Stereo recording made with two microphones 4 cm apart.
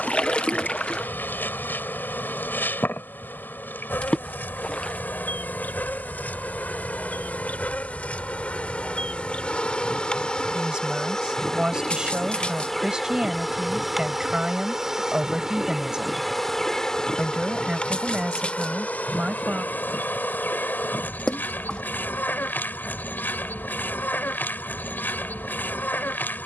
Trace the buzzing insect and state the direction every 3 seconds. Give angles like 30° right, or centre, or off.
60° left, 50° left, 40° left, 20° left, centre, 10° left, 50° left, 50° left, 50° left.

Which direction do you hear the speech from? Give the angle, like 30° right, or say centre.
20° right.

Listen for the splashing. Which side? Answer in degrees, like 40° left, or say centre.
30° left.